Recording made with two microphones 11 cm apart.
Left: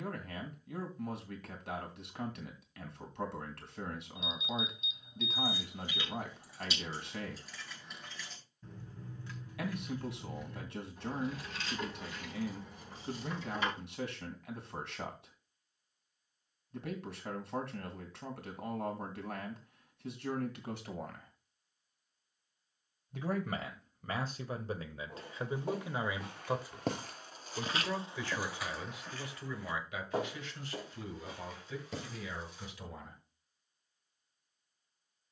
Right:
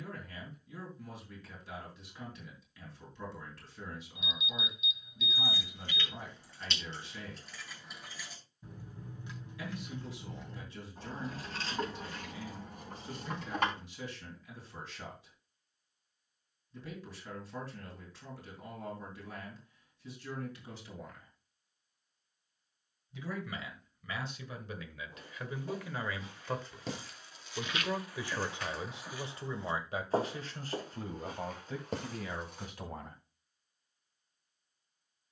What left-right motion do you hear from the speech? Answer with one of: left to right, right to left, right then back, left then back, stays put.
left to right.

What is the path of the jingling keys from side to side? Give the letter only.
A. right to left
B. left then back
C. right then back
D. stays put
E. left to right
E.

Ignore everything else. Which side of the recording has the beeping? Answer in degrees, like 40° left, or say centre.
30° left.